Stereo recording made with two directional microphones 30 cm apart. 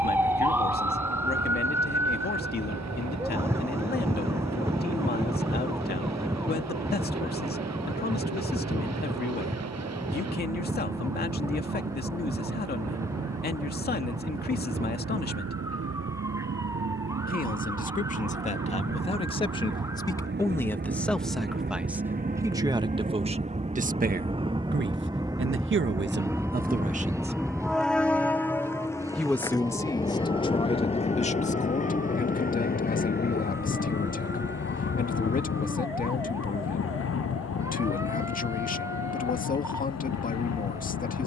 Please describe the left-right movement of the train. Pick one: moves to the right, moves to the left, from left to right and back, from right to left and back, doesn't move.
moves to the left.